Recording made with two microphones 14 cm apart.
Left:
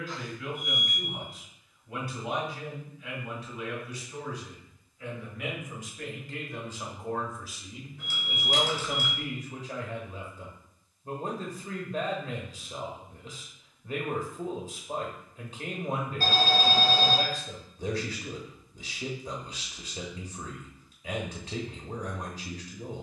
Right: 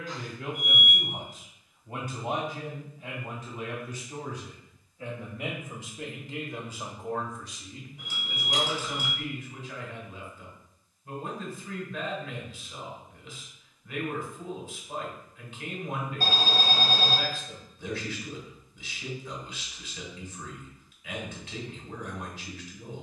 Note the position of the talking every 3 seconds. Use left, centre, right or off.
right, right, centre, left, left, left, left, left.